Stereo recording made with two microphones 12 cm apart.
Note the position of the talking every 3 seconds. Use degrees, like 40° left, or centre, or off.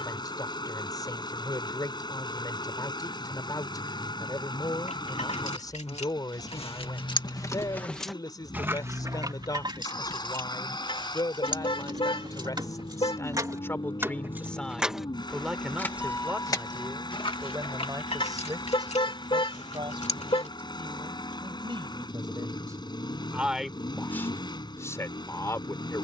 30° left, 30° left, 30° left, 30° left, 20° left, 20° right, 40° right, 30° right, 20° left.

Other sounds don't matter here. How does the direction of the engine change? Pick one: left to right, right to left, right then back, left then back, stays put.
stays put.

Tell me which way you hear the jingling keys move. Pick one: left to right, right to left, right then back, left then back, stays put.
right then back.